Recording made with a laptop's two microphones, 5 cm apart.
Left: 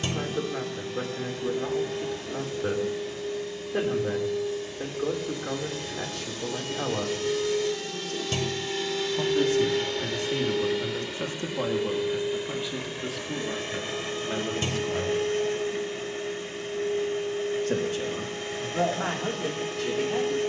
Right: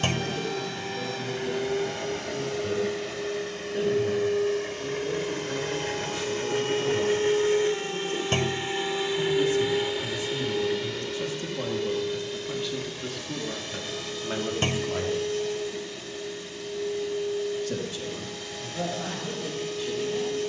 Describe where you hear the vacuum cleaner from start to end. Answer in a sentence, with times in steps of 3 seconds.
You can hear the vacuum cleaner on the right from 0 s, in the centre from 9 s and on the left from 12 s.